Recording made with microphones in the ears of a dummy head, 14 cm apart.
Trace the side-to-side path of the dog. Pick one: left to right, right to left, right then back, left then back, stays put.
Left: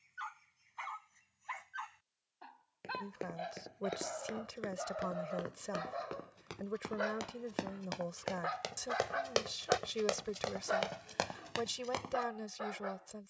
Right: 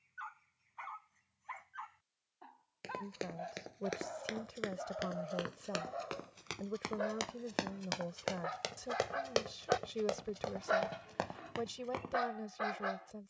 left to right.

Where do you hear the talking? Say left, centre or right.
left.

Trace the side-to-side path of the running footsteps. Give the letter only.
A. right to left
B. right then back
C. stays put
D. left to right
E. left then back
A.